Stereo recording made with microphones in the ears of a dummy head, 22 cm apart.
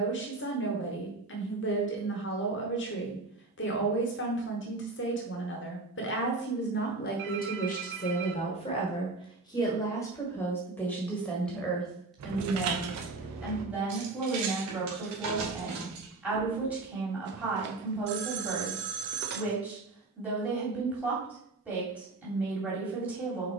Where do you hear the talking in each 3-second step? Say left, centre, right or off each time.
left, left, left, centre, centre, centre, centre, centre.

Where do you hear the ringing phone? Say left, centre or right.
right.